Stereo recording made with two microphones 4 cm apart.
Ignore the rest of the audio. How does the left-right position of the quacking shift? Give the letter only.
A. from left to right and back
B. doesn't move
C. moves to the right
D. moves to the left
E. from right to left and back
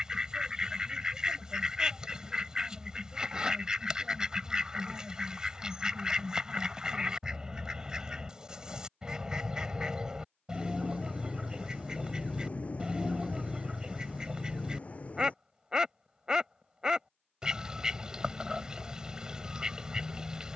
B.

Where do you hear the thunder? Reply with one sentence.
In this clip you hear the thunder on the left.